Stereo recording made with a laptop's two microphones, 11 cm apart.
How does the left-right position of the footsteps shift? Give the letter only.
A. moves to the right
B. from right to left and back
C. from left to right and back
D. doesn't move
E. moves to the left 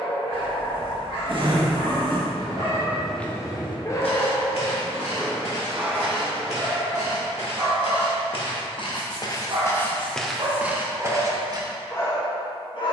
B.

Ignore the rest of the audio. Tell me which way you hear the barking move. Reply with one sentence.
In this clip you hear the barking go right and come back.